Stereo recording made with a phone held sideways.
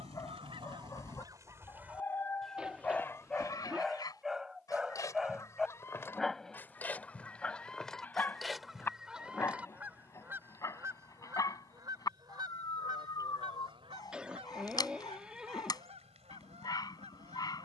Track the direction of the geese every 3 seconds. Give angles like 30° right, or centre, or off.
20° right, 30° left, 10° left, 20° right, 40° right, 60° right.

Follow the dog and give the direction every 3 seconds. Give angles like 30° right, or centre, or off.
20° left, centre, 10° left, 20° left, 30° left, 30° left.